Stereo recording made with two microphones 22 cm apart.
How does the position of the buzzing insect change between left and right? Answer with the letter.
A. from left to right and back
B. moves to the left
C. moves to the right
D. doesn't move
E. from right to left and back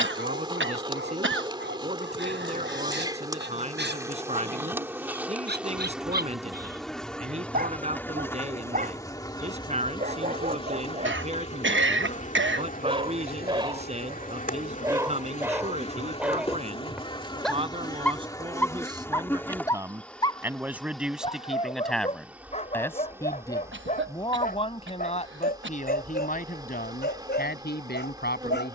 E.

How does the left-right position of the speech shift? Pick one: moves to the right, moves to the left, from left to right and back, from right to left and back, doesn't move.
moves to the left.